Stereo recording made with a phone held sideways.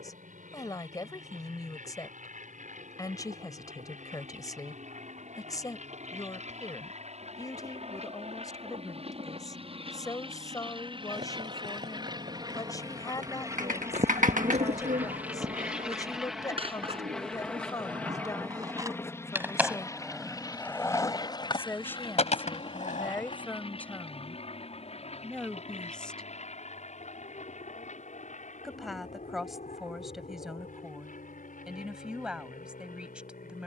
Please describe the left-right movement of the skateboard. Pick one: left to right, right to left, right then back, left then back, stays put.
right to left.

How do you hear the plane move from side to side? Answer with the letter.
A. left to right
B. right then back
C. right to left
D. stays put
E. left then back
C.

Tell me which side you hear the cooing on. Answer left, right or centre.
right.